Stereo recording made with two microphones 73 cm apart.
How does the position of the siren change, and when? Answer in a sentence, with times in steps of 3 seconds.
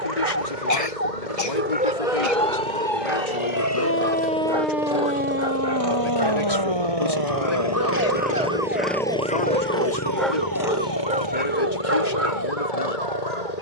You can hear the siren on the left from 0 s, in the centre from 3 s and on the right from 6 s.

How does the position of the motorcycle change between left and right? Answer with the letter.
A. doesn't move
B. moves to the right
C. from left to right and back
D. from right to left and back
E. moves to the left
E.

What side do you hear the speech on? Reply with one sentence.
You can hear the speech on the left.